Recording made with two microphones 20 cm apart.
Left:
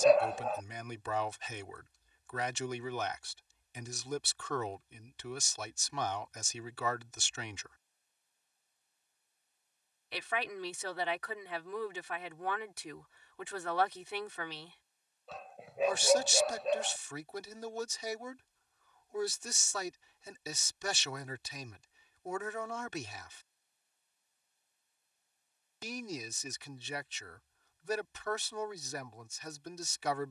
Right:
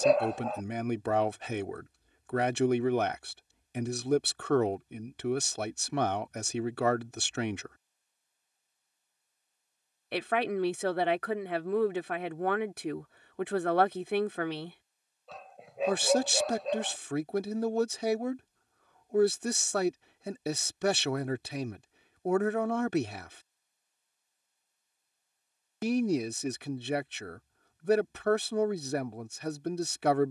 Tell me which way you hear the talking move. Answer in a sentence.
In this clip you hear the talking stay put.